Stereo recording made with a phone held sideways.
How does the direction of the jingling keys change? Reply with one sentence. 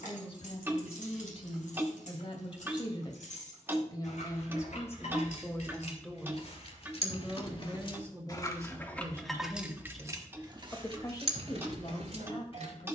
You can hear the jingling keys move from left to right.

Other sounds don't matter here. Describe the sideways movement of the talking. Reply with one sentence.
You can hear the talking go right and come back.